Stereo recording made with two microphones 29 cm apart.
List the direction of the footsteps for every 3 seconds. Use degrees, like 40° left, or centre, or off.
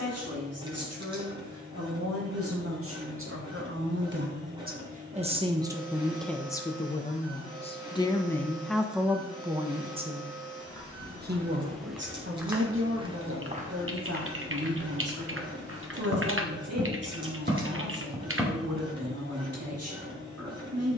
off, off, off, 10° left, 20° right, 50° right, 10° right.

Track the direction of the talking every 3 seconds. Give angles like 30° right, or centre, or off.
60° right, 30° right, 10° left, 30° right, 50° right, 60° right, 60° right.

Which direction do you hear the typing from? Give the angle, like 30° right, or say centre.
50° right.